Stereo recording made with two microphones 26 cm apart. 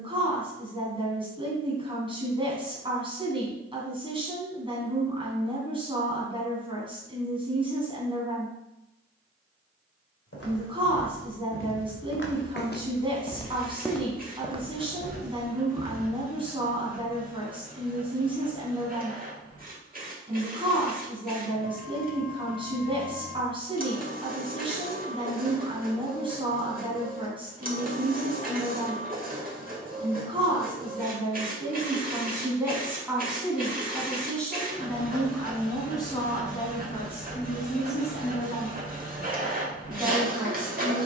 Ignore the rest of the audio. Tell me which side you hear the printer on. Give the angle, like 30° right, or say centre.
30° right.